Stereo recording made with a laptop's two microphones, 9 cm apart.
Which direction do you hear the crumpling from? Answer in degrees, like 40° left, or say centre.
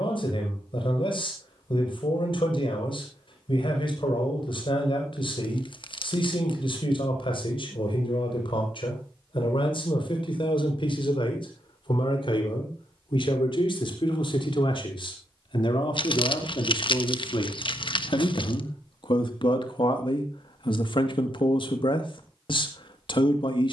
60° left.